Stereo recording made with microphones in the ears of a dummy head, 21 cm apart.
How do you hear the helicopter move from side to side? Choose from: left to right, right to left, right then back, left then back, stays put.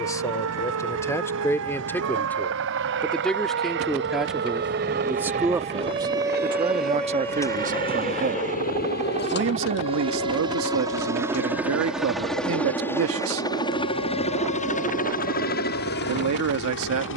right to left.